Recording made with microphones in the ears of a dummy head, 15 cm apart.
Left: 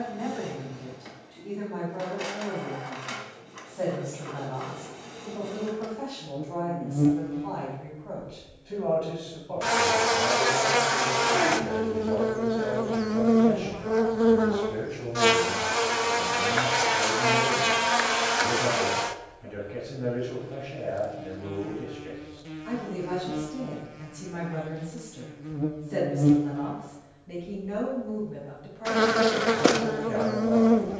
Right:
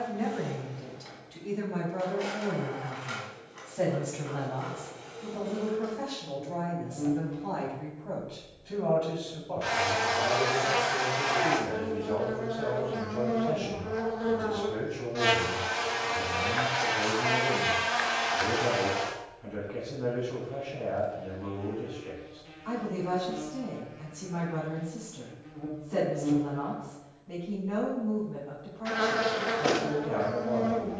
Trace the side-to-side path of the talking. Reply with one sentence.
You can hear the talking move from right to left.